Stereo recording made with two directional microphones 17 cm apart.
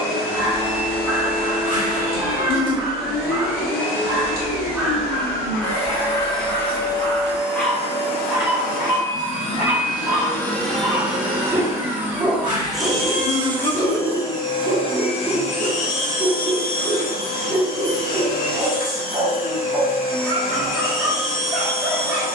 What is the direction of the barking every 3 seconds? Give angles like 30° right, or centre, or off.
20° right, 10° right, 10° left, 10° right, 10° right, 10° right, 10° right, 10° right.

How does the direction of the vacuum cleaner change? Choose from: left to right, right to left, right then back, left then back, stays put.
right then back.